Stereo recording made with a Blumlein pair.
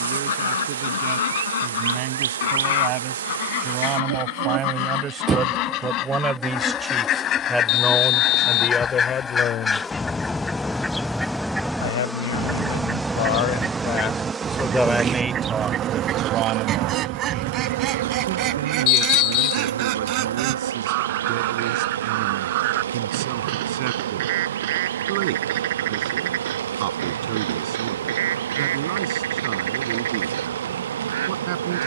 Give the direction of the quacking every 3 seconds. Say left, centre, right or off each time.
left, left, left, centre, centre, right, right, right, right, right, right.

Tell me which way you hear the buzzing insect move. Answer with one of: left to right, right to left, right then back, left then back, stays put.
left then back.